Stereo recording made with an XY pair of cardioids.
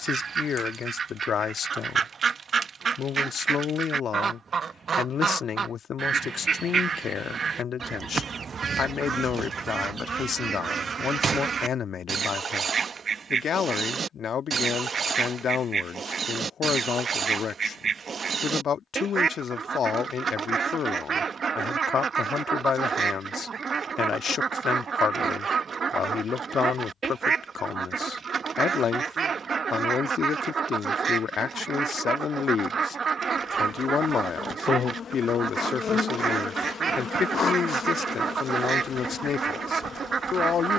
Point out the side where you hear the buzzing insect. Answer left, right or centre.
left.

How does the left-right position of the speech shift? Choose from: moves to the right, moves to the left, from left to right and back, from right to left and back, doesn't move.
doesn't move.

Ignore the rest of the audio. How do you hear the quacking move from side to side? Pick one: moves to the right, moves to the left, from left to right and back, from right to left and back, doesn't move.
doesn't move.